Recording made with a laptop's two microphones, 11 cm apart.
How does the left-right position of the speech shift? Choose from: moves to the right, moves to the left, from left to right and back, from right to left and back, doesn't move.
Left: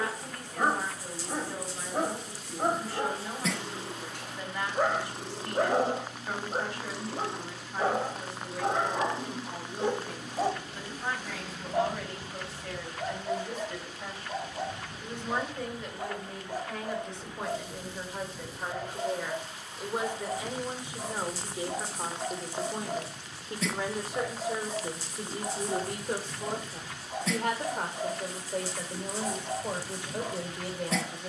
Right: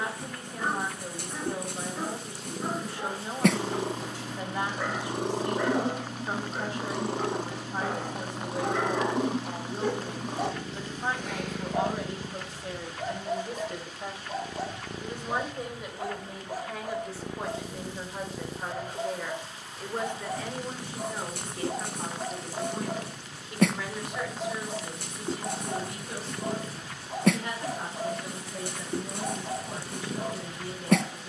moves to the left.